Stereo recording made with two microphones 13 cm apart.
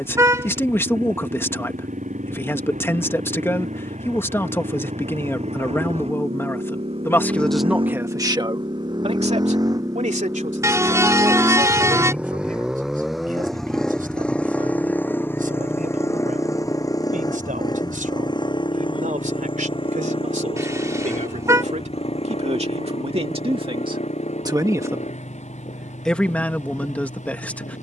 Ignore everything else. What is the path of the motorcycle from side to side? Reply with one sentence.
In this clip you hear the motorcycle travel towards the left.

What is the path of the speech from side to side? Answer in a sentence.
In this clip you hear the speech move from left to right and back again.